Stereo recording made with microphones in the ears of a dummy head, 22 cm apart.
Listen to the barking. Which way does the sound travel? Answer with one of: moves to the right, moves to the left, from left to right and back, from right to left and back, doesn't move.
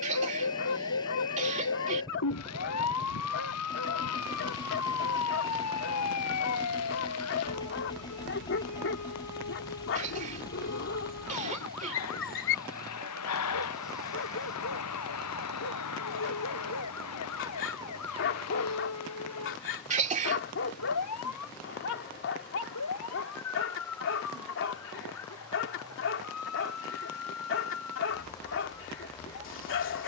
doesn't move.